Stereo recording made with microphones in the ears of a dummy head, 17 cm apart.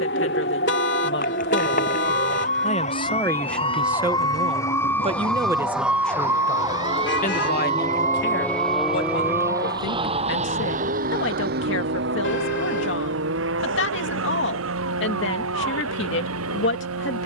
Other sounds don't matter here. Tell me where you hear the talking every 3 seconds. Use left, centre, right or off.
left, centre, left, left, left, left.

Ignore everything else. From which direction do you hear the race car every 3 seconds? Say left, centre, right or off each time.
left, left, left, right, right, right.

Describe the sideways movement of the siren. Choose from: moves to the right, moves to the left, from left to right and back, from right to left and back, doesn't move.
moves to the right.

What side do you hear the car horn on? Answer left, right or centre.
left.